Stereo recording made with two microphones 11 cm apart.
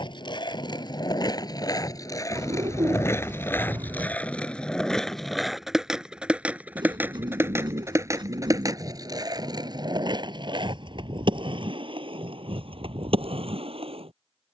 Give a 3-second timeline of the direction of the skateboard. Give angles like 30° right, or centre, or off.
40° left, 10° left, 20° right, 40° right, 50° right.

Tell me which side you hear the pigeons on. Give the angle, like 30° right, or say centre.
40° right.